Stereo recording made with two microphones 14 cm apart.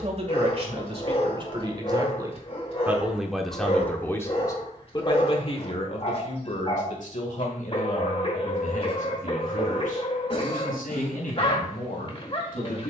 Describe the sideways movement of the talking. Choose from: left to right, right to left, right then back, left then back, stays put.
right to left.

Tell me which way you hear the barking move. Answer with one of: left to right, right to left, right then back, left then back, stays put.
stays put.